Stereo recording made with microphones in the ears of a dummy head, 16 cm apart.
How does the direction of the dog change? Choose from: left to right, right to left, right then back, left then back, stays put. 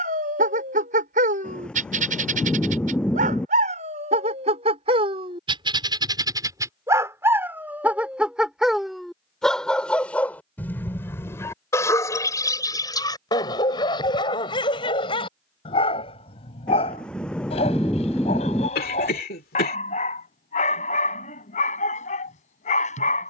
right to left.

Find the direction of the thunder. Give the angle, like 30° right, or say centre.
10° left.